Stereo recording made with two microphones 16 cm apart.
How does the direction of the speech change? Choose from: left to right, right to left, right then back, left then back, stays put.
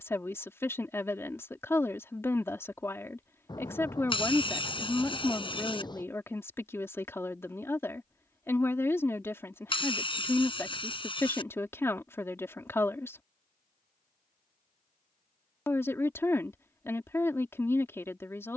stays put.